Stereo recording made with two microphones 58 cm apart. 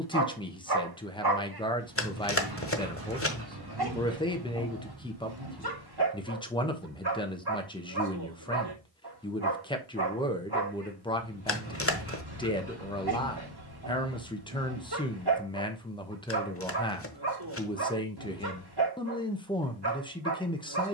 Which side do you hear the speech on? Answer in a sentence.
You can hear the speech in the centre.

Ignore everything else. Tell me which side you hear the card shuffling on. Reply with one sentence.
In this clip you hear the card shuffling on the left.